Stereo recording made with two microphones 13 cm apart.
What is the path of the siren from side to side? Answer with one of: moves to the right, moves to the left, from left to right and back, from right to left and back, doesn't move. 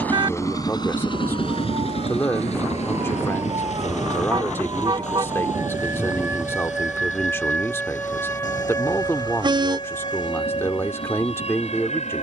moves to the left.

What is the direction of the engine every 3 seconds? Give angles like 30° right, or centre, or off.
40° left, 60° left, 70° left, 70° left.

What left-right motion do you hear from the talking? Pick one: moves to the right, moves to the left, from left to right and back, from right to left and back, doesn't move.
doesn't move.